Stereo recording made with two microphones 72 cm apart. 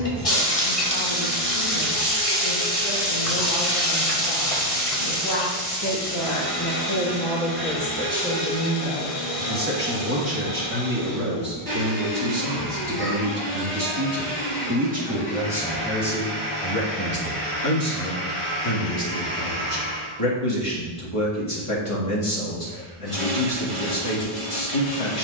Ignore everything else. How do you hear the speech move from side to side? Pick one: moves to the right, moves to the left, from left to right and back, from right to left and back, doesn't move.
from left to right and back.